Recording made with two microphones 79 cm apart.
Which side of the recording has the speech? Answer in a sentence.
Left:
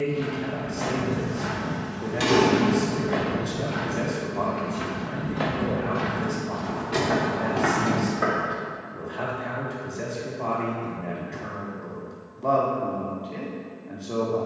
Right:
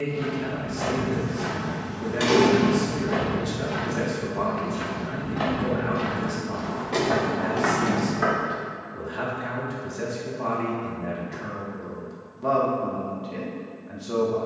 You can hear the speech on the right.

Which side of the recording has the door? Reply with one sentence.
You can hear the door on the left.